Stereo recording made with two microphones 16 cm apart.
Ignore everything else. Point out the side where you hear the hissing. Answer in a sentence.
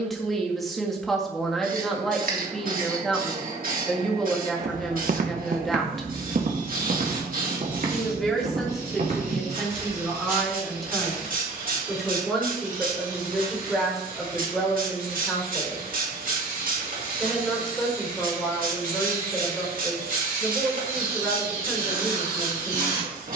You can hear the hissing on the right.